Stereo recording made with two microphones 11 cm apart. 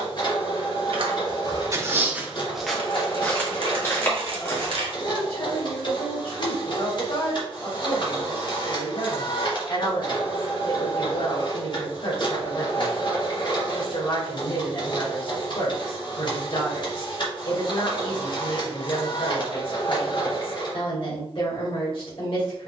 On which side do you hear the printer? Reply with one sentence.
You can hear the printer on the left.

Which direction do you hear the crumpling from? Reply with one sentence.
In this clip you hear the crumpling on the right.